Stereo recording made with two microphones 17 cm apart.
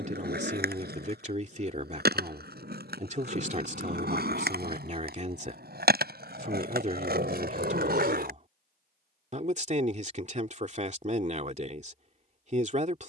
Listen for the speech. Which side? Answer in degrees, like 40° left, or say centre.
50° right.